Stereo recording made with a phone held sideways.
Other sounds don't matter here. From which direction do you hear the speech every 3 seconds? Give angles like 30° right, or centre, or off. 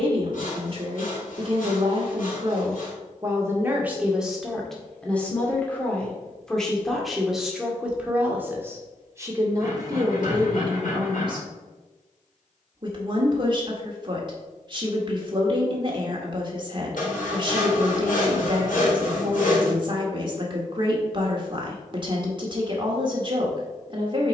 40° right, centre, centre, 30° right, 40° right, 40° right, 40° right, 40° right.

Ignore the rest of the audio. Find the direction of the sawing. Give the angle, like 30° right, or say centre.
80° left.